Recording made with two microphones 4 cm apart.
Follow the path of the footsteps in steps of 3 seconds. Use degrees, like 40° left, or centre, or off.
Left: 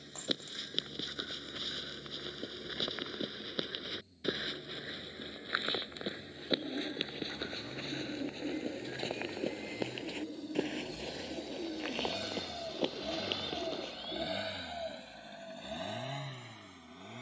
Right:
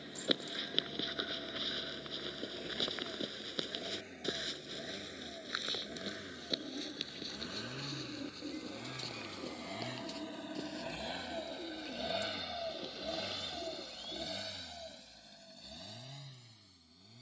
10° right, 20° left, 30° left, 50° left, 60° left, off.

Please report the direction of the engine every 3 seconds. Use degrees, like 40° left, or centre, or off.
70° right, 70° right, 60° right, 40° right, 10° left, 50° left.